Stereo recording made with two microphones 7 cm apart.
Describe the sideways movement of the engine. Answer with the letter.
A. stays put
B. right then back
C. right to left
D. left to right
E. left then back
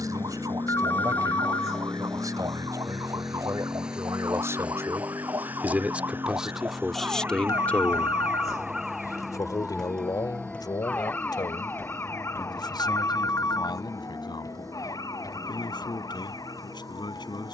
D.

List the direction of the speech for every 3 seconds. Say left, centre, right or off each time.
right, right, centre, left, left, left.